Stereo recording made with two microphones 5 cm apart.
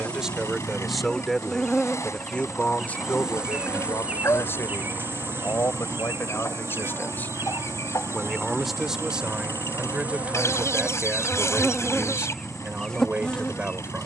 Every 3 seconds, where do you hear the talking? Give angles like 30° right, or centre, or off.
10° left, 50° left, 30° left, 20° right, 20° right.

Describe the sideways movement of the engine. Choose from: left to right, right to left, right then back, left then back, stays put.
stays put.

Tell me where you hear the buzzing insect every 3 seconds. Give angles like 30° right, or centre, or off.
10° left, 30° right, 60° right, 20° right, 10° left.